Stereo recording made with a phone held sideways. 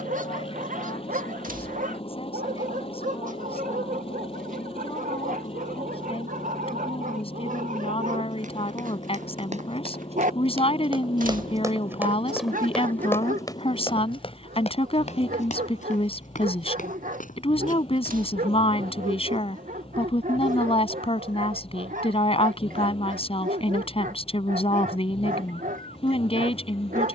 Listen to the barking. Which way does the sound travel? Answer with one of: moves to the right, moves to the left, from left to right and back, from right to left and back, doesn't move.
doesn't move.